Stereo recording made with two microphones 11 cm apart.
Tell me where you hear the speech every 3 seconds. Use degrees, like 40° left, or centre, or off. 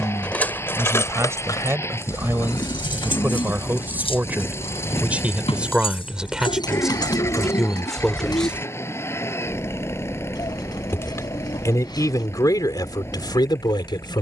20° right, 10° right, centre, 30° left, 40° left.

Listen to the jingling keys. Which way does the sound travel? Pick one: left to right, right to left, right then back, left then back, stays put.
left then back.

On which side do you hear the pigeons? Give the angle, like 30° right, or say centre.
40° left.